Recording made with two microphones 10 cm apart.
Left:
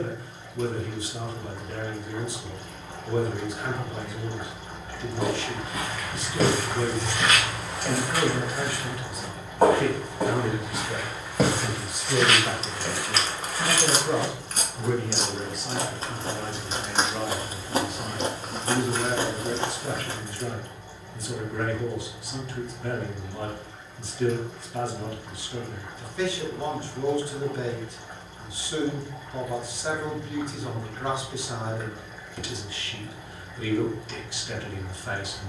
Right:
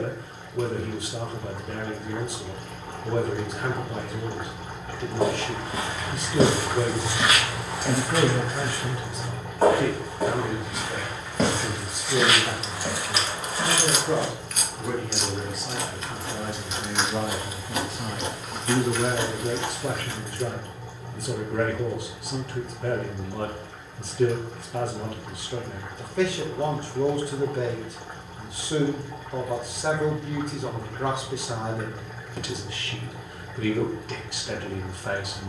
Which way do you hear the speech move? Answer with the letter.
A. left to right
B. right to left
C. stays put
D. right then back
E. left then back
E.